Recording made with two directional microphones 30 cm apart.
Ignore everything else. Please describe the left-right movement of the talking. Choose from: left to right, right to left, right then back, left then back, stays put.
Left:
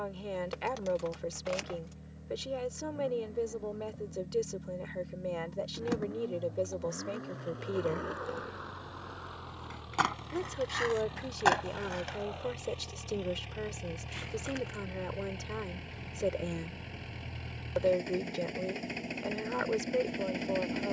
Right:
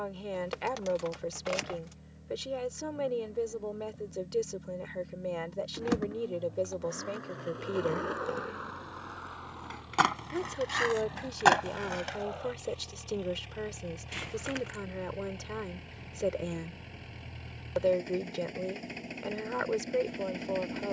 stays put.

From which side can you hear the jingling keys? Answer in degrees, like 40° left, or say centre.
20° right.